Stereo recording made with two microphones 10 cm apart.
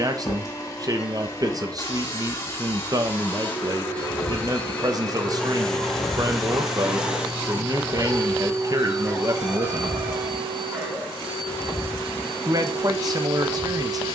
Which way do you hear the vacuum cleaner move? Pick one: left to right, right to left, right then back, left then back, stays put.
left to right.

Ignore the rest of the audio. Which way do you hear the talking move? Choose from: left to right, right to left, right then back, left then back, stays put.
stays put.